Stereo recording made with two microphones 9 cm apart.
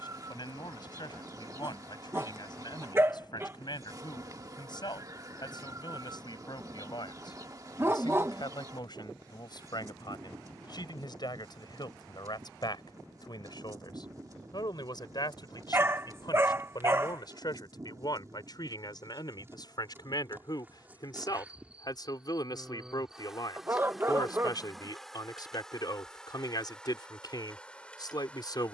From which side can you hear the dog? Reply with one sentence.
In this clip you hear the dog on the right.